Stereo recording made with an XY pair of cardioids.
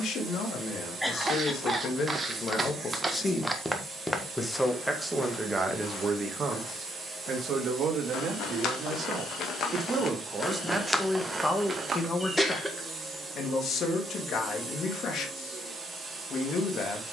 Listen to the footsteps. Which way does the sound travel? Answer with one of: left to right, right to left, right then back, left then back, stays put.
left then back.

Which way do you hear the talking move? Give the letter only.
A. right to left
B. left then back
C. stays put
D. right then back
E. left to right
D.